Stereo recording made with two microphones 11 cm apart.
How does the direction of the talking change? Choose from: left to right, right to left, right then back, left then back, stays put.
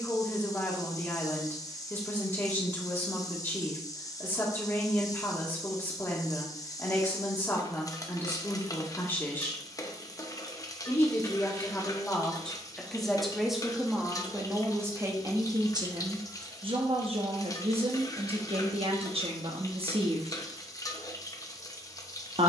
left to right.